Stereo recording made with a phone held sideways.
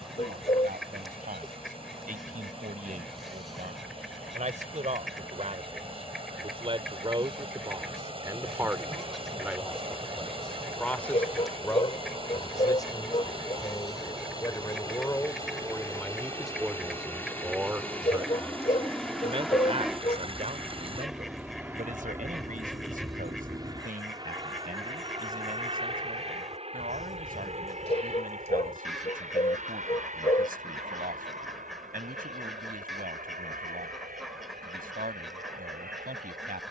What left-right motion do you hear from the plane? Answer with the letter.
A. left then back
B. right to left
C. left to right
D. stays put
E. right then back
C.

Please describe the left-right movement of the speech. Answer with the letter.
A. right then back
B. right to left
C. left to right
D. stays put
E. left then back
E.